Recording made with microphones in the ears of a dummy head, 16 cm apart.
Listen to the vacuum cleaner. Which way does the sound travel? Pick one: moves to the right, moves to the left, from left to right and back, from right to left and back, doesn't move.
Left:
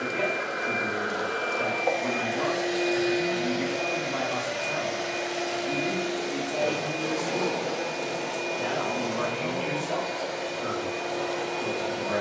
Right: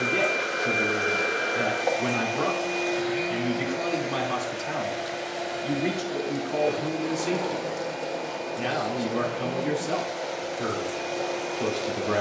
moves to the left.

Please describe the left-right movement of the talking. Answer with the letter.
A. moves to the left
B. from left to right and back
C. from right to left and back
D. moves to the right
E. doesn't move
E.